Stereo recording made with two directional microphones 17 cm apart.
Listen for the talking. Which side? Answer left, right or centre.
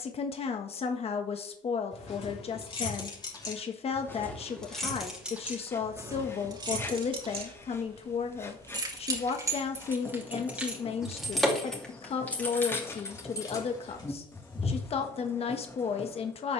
left.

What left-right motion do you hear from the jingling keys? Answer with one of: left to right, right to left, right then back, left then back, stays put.
right then back.